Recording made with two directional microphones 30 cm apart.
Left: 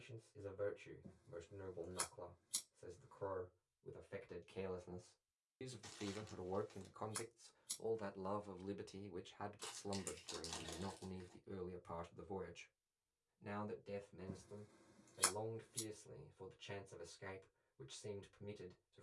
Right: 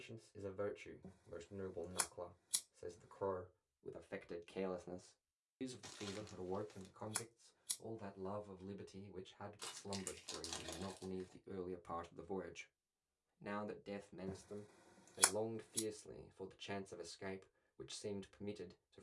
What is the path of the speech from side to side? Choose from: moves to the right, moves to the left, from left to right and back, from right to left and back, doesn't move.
from right to left and back.